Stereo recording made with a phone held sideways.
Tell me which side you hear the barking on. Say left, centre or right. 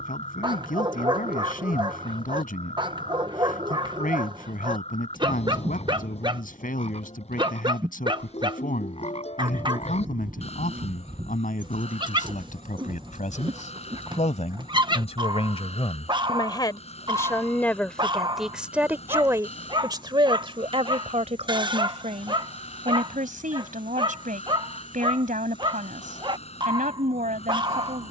right.